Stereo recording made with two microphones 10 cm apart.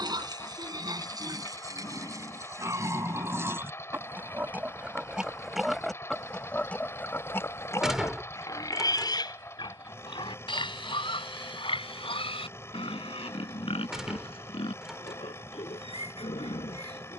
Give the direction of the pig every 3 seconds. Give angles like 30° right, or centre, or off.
40° right, 20° right, 20° left, 60° left, 70° left, 80° left.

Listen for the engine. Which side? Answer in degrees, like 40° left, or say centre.
30° left.